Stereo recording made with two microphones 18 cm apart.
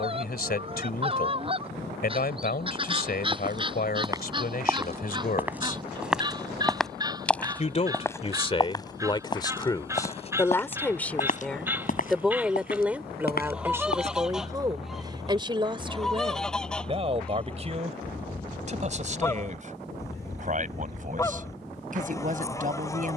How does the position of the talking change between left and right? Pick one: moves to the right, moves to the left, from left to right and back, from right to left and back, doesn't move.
moves to the right.